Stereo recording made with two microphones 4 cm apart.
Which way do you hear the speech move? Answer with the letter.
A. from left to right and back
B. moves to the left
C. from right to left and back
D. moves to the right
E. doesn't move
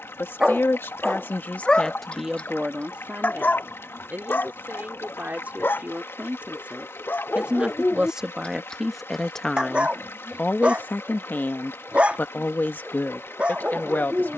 A.